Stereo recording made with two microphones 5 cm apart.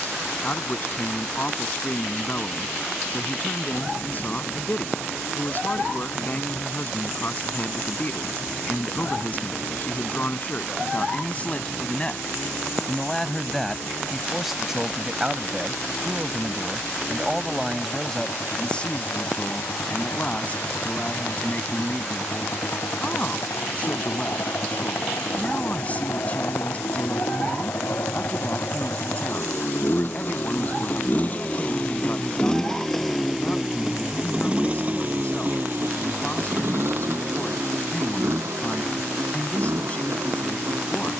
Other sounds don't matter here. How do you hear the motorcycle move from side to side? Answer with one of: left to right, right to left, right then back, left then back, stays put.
left to right.